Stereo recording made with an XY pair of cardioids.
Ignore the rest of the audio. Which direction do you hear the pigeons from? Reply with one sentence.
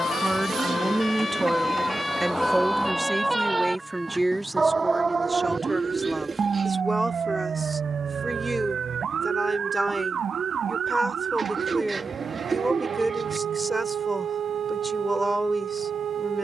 In this clip you hear the pigeons on the right.